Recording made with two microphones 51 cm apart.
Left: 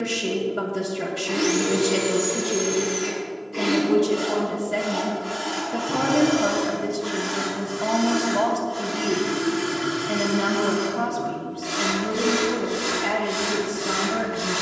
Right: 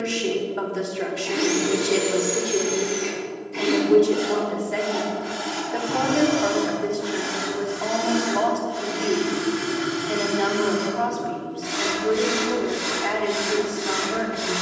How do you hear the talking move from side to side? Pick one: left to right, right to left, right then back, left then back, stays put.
stays put.